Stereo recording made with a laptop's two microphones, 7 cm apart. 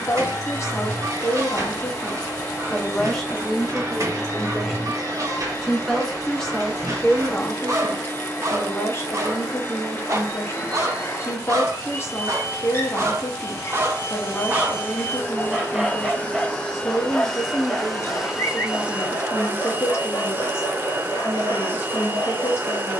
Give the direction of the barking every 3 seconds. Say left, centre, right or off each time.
right, right, right, right, right, centre, left, left.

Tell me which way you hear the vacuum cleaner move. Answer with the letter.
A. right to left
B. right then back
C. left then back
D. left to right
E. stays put
D.